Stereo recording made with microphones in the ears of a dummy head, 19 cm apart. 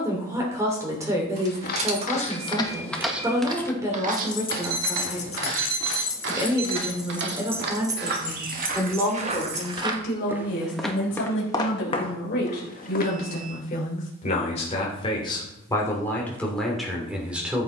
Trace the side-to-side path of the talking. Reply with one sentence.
You can hear the talking move from right to left and back again.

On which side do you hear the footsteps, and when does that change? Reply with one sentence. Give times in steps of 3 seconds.
In this clip you hear the footsteps on the left from 0 s, on the right from 3 s, in the centre from 9 s, on the left from 12 s and not at all from 15 s.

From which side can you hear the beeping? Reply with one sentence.
You can hear the beeping on the right.